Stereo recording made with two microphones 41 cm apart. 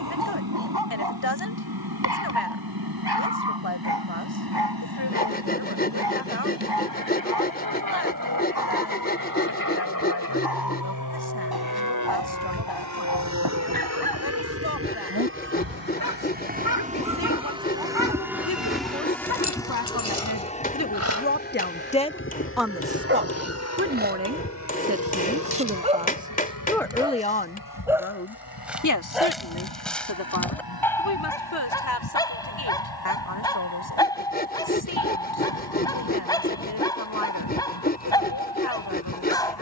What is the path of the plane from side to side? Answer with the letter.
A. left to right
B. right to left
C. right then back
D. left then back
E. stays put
B.